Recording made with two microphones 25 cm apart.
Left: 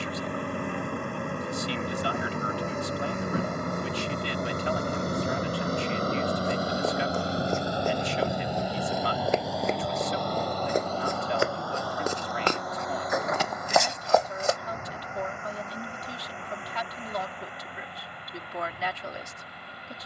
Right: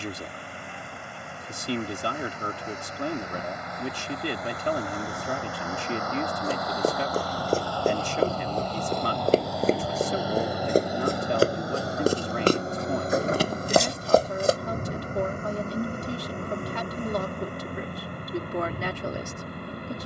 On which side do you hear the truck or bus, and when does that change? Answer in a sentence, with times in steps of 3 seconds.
In this clip you hear the truck or bus on the left from 0 s, in the centre from 9 s and on the right from 12 s.